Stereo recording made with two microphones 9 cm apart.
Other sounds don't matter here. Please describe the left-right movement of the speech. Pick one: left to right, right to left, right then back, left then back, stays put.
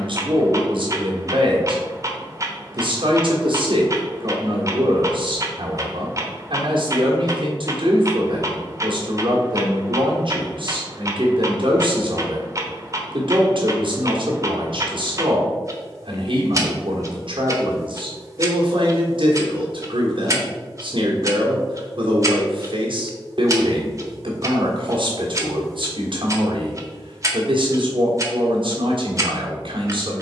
stays put.